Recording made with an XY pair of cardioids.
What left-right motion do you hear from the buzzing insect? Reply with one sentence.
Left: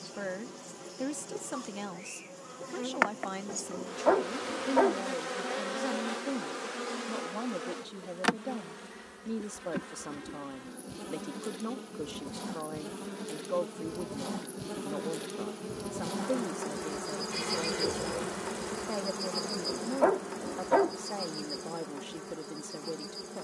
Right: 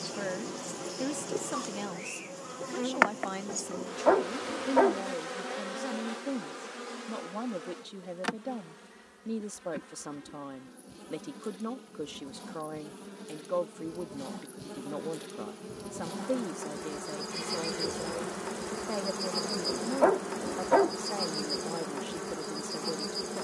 In this clip you hear the buzzing insect move from right to left and back again.